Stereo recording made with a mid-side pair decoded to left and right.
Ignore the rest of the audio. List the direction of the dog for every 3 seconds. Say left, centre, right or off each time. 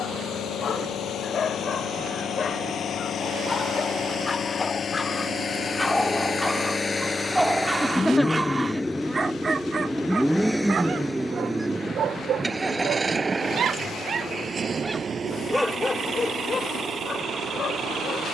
left, left, centre, right, right, left.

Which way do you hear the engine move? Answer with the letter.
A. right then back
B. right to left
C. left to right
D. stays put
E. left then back
C.